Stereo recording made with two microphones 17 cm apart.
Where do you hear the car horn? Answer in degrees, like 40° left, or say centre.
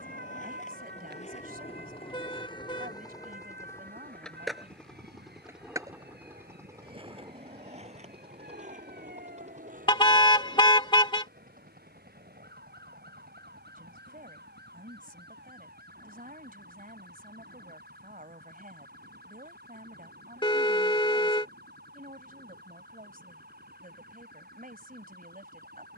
30° left.